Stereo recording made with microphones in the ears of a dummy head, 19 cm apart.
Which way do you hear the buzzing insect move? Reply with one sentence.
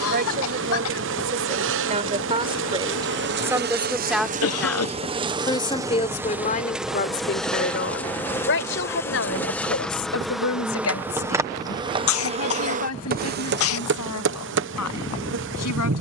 You can hear the buzzing insect move from right to left and back again.